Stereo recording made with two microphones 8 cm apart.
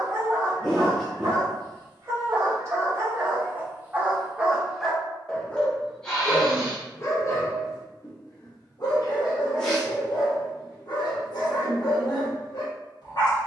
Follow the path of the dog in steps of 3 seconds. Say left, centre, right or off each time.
right, centre, left, left, left.